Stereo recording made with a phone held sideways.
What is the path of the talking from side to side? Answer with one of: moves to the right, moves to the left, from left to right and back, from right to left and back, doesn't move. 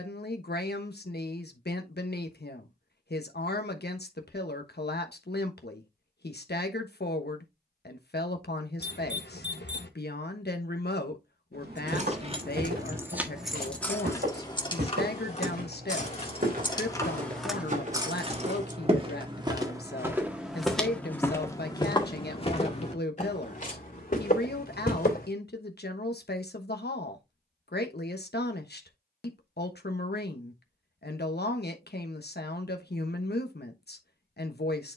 doesn't move.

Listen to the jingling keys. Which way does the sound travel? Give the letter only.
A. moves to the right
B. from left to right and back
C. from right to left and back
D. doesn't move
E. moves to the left
C.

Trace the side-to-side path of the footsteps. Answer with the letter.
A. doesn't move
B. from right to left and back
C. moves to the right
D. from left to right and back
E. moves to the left
E.